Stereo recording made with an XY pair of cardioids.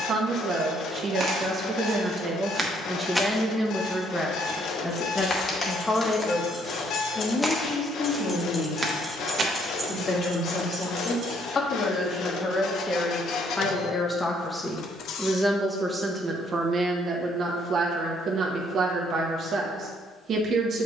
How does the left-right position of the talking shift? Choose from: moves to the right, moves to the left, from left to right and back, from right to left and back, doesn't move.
from right to left and back.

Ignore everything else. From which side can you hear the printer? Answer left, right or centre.
left.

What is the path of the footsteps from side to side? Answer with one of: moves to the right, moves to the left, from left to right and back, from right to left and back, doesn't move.
from right to left and back.